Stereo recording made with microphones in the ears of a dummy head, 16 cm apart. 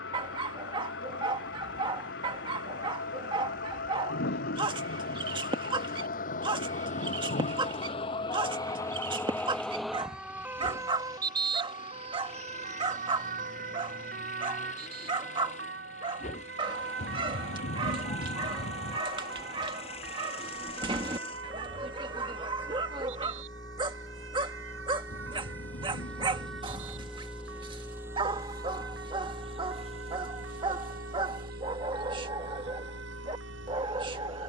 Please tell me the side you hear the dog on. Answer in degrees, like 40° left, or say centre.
30° right.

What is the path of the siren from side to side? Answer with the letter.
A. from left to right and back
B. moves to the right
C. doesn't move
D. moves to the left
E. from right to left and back
B.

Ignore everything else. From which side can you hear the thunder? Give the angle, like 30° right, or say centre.
70° left.